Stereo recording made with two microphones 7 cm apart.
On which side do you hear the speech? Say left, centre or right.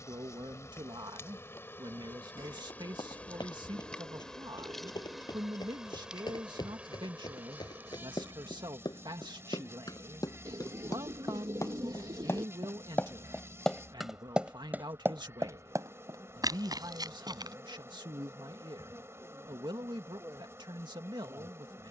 right.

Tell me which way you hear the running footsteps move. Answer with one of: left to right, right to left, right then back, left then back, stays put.
left to right.